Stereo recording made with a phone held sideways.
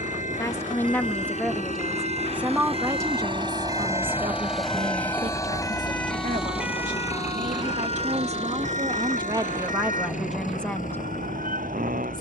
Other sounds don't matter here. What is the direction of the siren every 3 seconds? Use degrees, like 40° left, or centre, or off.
60° left, 40° left, 30° right, 70° right.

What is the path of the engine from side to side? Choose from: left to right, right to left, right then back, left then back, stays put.
right to left.